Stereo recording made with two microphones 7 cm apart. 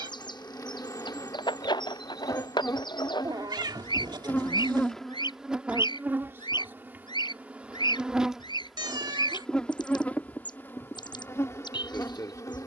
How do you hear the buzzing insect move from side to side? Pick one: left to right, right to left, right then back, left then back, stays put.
right then back.